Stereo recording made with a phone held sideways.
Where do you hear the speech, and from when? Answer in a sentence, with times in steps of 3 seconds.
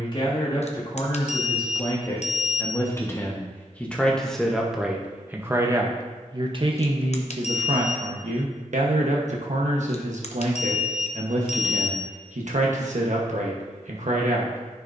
You can hear the speech on the left from 0 s, in the centre from 3 s and on the right from 6 s.